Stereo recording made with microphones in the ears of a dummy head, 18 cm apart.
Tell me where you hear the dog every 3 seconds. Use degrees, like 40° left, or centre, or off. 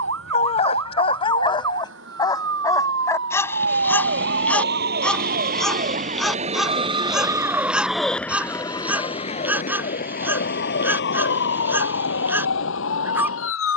20° left, 10° left, centre, 10° right, 10° right.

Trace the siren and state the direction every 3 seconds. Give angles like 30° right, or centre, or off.
70° right, 50° right, 10° right, 50° left, 70° left.